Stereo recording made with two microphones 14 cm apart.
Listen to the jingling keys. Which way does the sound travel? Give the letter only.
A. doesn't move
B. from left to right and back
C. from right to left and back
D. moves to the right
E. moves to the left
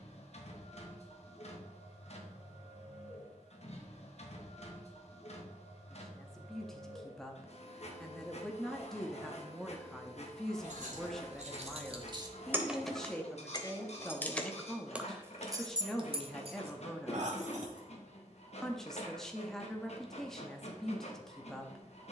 C.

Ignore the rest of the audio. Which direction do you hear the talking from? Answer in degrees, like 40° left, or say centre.
centre.